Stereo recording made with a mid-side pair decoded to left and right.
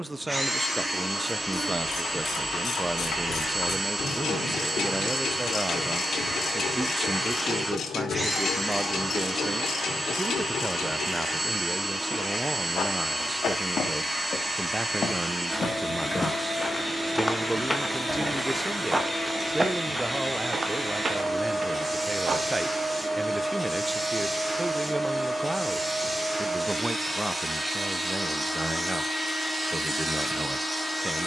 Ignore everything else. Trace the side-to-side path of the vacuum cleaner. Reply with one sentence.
You can hear the vacuum cleaner stay put.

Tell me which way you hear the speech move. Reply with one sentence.
In this clip you hear the speech stay in one place.